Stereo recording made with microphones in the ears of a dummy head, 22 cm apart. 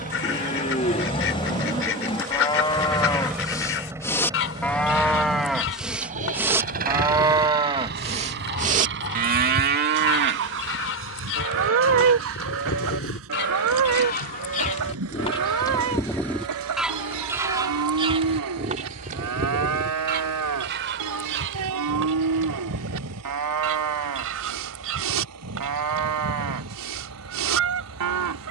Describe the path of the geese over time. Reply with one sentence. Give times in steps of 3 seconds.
You can hear the geese on the left from 0 s, in the centre from 15 s and on the right from 18 s.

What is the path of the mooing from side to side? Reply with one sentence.
You can hear the mooing travel towards the right.